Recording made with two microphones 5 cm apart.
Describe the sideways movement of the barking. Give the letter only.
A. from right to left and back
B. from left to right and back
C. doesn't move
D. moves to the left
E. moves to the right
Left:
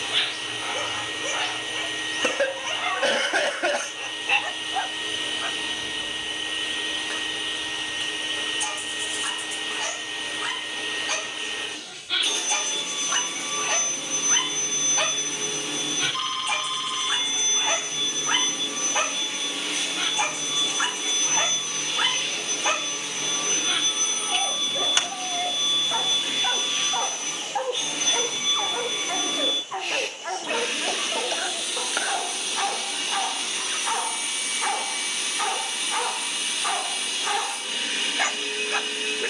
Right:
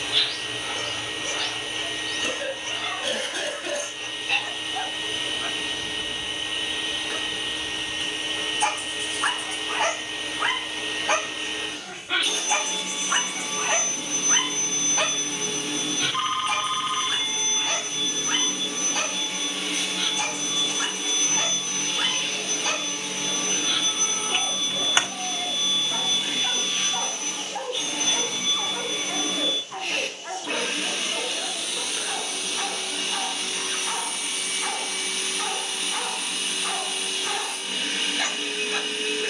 B.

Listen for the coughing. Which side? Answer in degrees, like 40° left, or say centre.
60° left.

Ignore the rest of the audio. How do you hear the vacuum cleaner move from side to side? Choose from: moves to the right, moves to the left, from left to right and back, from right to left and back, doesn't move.
doesn't move.